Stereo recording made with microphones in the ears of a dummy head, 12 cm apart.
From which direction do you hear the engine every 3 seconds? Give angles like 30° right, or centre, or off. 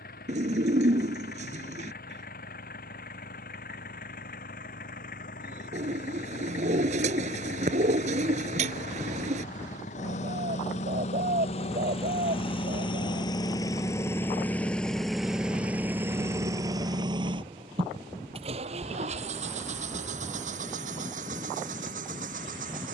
80° left, 70° left, 70° left, 60° left, 30° left, 20° right, 60° right, 70° right.